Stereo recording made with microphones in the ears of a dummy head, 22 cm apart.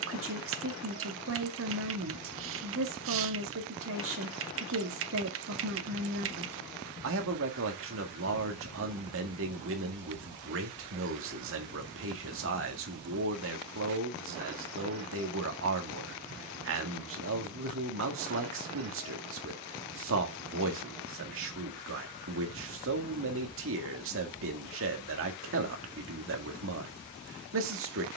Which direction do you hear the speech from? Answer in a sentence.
In this clip you hear the speech on the right.